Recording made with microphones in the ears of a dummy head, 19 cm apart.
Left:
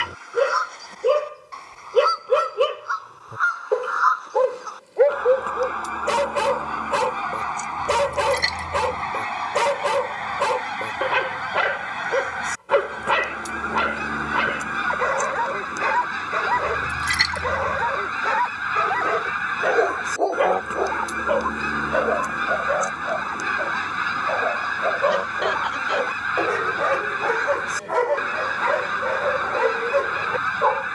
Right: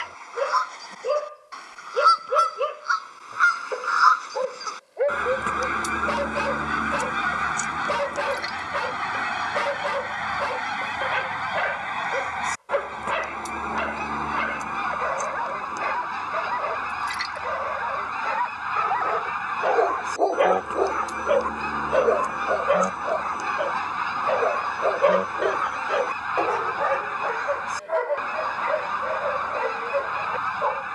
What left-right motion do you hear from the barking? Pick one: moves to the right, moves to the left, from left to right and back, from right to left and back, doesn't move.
from left to right and back.